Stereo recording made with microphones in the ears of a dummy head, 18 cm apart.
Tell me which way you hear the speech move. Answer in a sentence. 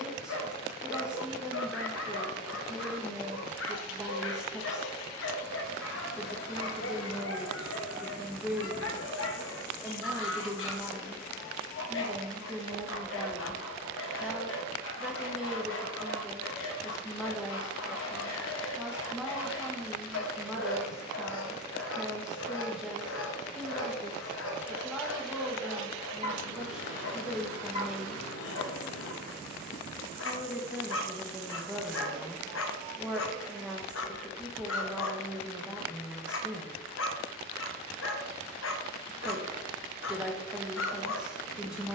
You can hear the speech stay put.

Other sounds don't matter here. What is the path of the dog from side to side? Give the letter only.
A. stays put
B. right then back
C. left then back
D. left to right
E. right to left
A.